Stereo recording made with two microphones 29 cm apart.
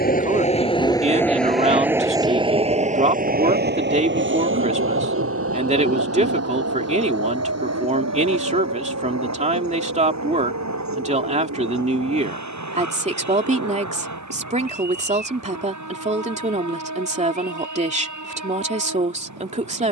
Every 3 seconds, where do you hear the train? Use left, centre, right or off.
centre, right, right, right, right, right, right.